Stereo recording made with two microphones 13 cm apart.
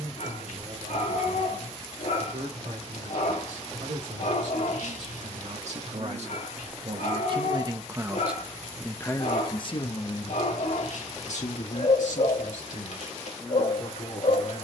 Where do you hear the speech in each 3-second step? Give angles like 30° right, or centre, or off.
70° right, 70° right, 30° right, 50° left, 70° left.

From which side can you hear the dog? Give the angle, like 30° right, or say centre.
70° left.